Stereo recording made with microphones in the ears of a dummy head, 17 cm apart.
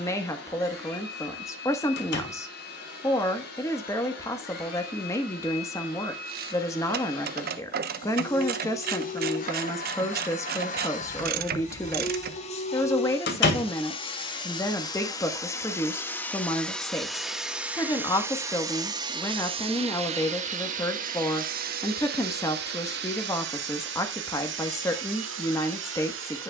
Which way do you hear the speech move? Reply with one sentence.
In this clip you hear the speech stay put.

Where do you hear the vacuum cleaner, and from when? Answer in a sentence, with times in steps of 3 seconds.
You can hear the vacuum cleaner on the left from 0 s, in the centre from 15 s and on the right from 18 s.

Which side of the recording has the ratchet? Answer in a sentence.
In this clip you hear the ratchet on the right.